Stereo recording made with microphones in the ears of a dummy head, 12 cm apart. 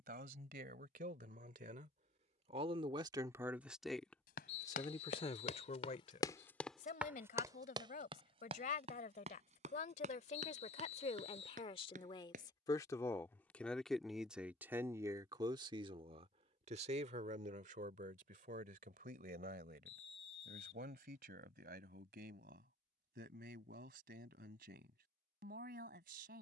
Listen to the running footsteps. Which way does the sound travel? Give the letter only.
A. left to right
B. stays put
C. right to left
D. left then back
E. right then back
A.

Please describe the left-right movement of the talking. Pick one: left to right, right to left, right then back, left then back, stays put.
left then back.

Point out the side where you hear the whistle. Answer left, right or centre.
left.